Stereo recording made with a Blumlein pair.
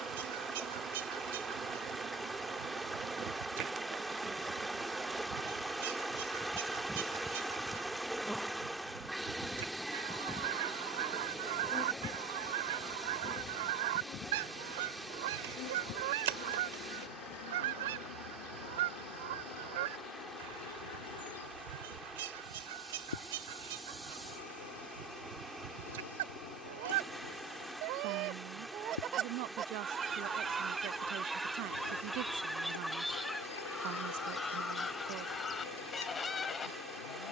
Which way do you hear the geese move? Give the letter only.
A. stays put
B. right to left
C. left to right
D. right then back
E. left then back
B.